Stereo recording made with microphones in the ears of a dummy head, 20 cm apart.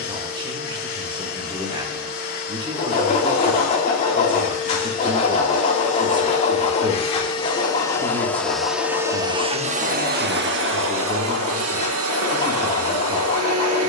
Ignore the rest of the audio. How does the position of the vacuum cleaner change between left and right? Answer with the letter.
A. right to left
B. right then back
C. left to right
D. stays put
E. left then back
C.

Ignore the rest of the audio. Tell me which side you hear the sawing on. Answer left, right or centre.
left.